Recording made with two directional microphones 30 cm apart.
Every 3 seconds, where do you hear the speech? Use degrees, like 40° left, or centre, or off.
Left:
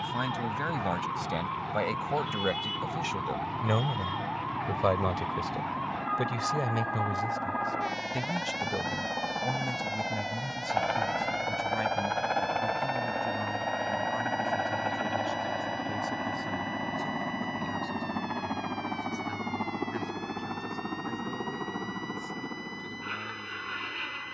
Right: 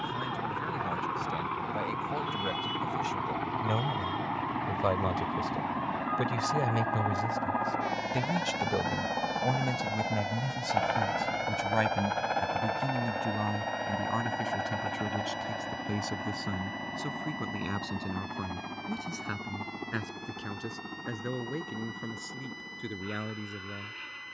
50° left, 20° left, 10° right, 30° right, 50° right, 60° right, 60° right, 70° right.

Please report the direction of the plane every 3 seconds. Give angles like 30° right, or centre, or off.
50° right, 40° right, 20° right, centre, 20° left, 30° left, 50° left, 50° left.